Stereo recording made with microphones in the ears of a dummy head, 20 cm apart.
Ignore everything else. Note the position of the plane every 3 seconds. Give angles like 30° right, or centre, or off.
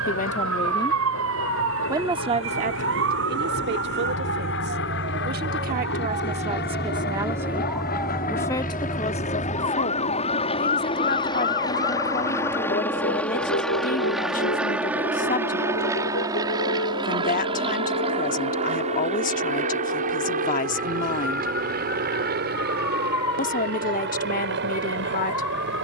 70° left, 60° left, 40° left, 30° left, centre, 20° right, 30° right, 40° right, 50° right.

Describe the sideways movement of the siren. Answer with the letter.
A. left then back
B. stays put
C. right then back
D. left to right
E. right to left
E.